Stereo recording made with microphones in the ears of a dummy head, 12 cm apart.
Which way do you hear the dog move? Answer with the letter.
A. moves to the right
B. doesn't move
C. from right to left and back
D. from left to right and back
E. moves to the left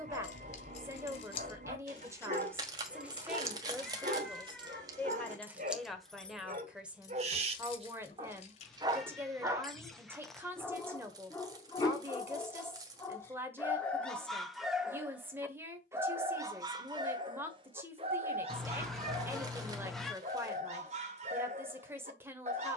C.